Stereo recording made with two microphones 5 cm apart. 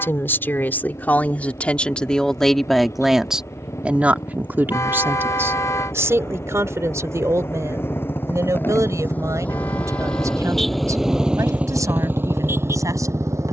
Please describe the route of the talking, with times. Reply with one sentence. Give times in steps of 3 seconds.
You can hear the talking on the left from 0 s and on the right from 3 s.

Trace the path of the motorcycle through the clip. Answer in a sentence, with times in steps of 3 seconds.
You can hear the motorcycle on the left from 0 s, in the centre from 9 s and on the right from 12 s.